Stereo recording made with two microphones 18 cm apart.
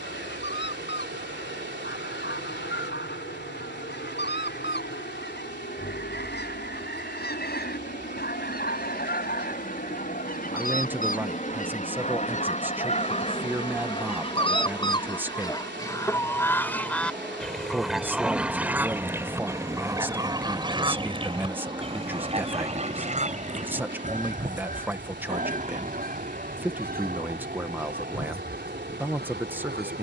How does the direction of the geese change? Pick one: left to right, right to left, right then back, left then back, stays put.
left to right.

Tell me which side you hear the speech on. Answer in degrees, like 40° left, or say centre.
10° right.